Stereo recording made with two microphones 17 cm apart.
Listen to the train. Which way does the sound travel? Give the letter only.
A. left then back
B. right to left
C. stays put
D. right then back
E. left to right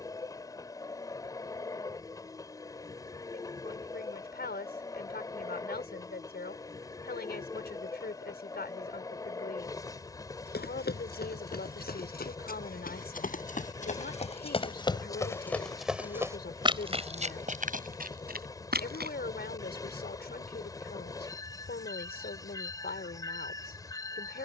C.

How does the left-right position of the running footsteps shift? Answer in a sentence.
In this clip you hear the running footsteps move to the right.